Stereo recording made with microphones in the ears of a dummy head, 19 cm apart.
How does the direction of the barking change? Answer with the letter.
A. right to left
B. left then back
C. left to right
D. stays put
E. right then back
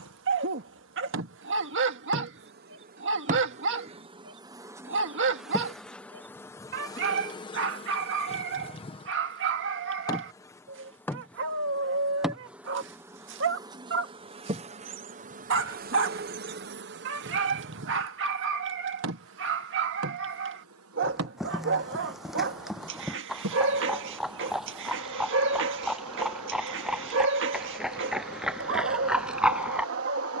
D.